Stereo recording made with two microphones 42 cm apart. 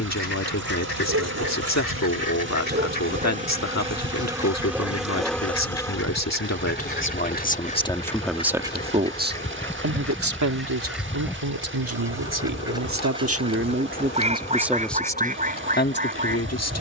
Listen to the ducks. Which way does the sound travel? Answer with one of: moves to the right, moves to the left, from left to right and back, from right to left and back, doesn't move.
moves to the right.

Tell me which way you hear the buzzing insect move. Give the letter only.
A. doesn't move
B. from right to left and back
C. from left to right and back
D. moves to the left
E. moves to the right
D.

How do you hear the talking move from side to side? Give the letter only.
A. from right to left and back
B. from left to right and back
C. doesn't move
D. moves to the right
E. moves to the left
B.